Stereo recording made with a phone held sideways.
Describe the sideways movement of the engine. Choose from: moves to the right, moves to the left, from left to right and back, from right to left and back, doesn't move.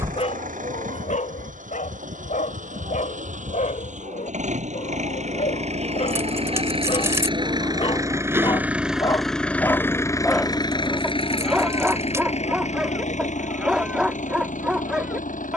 moves to the left.